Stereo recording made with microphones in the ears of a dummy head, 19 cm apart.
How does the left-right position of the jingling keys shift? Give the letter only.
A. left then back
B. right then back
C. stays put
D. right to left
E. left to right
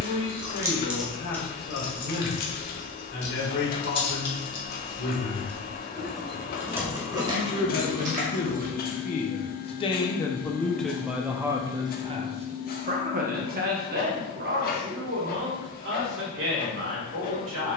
A.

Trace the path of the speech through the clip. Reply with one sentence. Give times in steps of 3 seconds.
In this clip you hear the speech on the left from 0 s, in the centre from 9 s and on the right from 12 s.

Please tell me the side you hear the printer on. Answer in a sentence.
You can hear the printer on the left.